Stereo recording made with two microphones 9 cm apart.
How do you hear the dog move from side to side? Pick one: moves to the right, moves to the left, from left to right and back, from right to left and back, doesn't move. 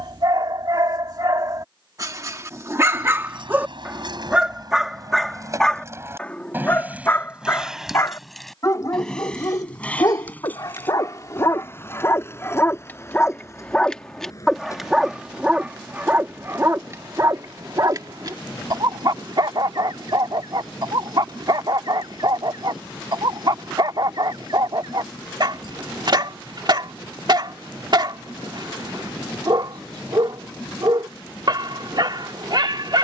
from right to left and back.